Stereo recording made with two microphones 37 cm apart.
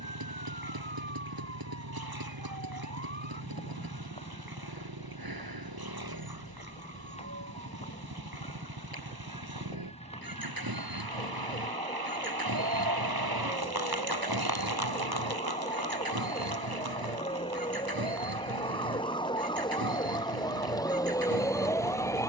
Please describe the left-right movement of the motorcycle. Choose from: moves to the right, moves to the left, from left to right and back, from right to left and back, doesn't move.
doesn't move.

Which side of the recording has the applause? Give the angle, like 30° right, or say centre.
70° right.